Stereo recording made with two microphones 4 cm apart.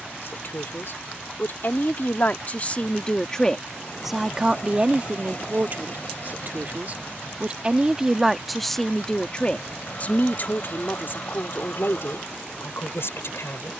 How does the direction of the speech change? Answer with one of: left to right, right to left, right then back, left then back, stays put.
right then back.